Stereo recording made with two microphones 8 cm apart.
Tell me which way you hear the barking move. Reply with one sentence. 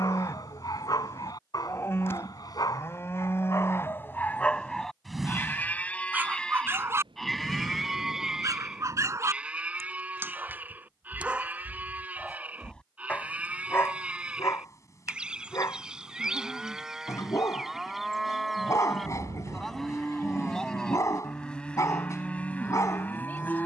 You can hear the barking go right and come back.